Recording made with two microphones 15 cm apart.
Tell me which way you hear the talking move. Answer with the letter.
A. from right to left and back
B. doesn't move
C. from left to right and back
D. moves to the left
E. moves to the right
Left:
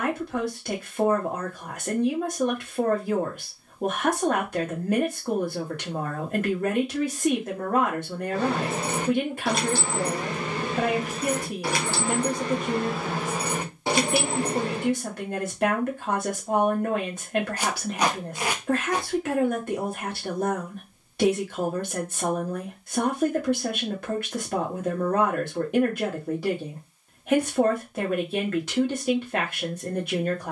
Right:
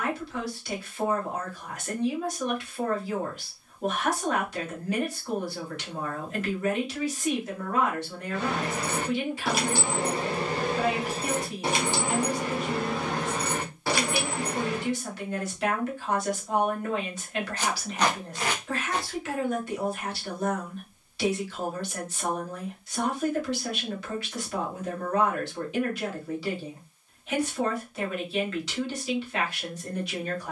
B.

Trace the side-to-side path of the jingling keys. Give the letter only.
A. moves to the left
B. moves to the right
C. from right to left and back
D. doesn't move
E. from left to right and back
E.